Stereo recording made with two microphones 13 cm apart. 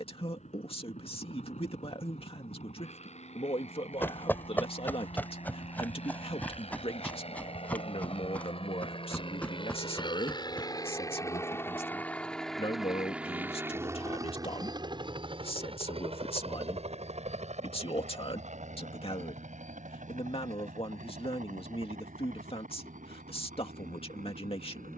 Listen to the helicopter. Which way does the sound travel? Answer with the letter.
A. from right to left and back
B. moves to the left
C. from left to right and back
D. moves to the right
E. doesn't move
D.